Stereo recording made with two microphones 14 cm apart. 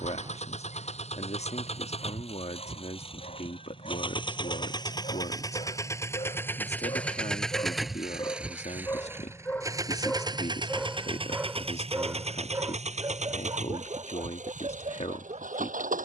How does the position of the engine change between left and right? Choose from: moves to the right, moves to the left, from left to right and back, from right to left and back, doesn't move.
moves to the right.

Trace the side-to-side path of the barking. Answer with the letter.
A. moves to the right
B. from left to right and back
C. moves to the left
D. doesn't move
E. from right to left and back
A.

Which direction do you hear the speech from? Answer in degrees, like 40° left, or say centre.
50° left.